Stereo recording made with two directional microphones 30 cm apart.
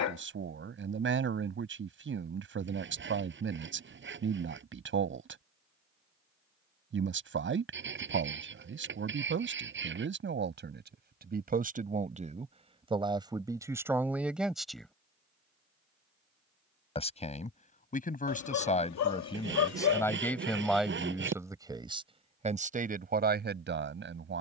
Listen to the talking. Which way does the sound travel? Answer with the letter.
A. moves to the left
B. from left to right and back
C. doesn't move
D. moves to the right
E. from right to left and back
E.